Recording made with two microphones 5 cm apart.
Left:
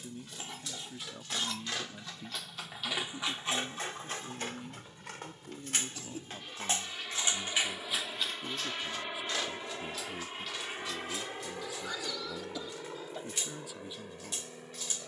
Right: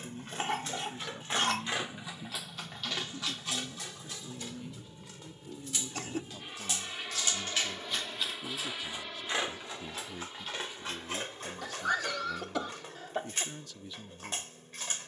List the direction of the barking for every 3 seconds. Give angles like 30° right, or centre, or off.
30° right, 50° left, 10° left, 40° right, 50° right.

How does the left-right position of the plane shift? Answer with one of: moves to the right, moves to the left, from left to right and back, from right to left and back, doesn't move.
moves to the left.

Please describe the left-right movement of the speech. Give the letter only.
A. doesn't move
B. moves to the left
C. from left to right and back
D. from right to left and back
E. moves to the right
A.